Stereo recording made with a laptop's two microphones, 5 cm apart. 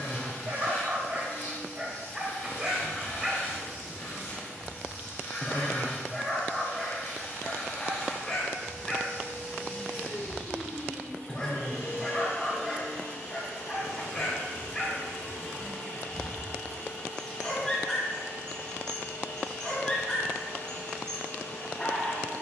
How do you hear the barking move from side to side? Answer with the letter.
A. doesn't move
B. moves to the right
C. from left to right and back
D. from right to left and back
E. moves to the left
E.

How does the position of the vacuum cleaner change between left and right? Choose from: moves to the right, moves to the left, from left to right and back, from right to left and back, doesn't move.
doesn't move.